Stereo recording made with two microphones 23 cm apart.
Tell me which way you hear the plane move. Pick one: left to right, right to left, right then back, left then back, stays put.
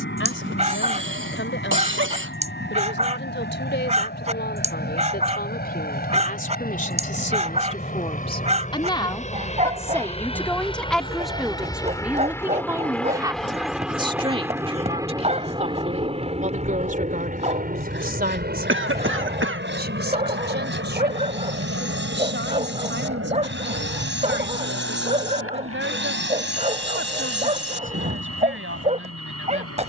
left to right.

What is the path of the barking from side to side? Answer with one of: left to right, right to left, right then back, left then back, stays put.
stays put.